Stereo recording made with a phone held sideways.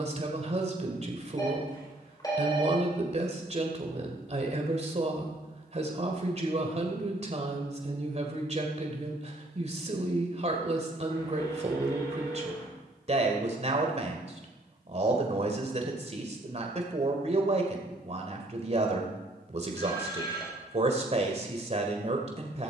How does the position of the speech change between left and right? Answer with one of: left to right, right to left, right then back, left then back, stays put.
stays put.